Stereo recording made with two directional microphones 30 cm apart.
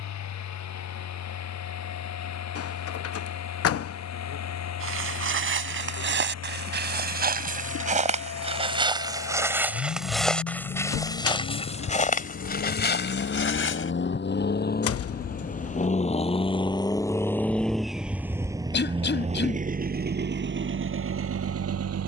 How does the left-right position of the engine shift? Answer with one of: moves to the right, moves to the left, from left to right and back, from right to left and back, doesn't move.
moves to the right.